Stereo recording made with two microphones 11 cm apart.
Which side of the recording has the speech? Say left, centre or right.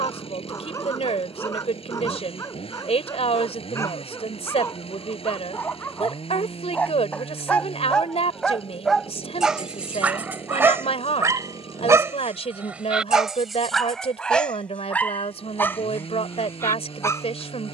left.